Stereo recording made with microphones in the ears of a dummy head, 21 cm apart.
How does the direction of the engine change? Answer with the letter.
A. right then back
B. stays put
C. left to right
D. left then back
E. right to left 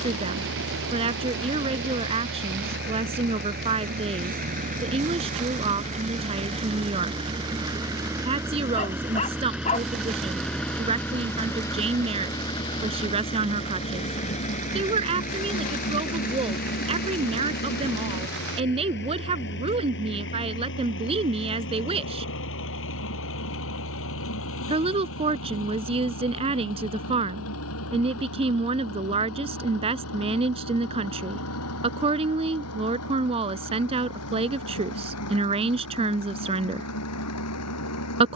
E.